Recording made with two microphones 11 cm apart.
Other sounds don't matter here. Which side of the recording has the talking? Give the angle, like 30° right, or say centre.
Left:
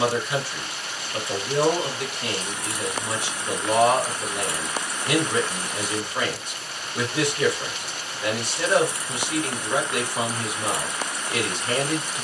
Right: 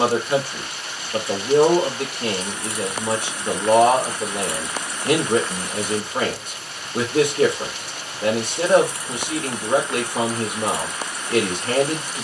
50° right.